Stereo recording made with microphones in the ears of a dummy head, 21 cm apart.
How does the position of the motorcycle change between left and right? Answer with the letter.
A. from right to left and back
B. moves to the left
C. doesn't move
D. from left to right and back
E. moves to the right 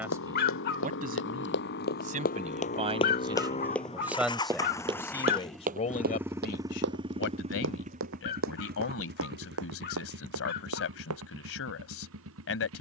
E.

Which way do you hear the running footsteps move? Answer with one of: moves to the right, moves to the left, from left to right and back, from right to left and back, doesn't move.
moves to the right.